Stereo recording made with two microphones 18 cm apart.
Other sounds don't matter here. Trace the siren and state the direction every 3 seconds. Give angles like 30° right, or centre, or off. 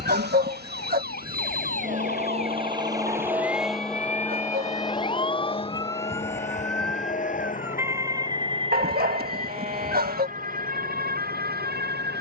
60° left, 40° left, 10° right, 50° right.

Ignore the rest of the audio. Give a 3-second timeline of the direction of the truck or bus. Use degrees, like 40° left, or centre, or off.
50° right, 10° left, 40° left, 50° left.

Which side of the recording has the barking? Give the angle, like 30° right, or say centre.
60° right.